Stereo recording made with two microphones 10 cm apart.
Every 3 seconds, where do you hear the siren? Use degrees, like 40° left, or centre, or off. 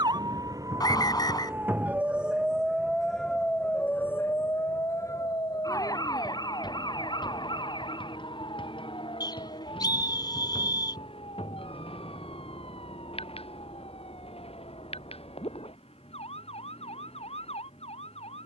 20° right, 20° left, 50° left, 60° left, 60° left, 70° left.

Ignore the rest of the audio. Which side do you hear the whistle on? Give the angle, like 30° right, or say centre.
40° left.